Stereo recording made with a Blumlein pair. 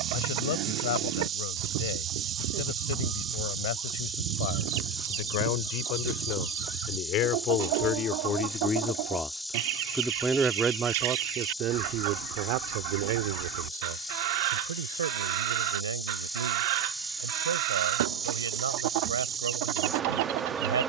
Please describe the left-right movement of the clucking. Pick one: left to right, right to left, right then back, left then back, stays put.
stays put.